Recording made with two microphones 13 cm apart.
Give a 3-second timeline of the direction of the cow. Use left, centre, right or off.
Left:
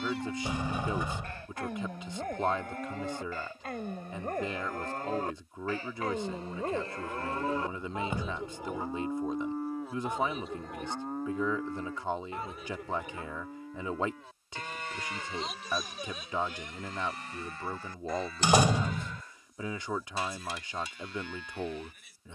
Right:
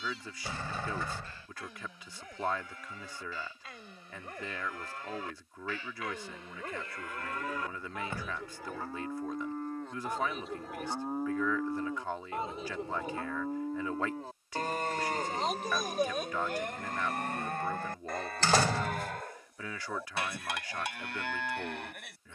left, left, left, centre, right, right, right, right.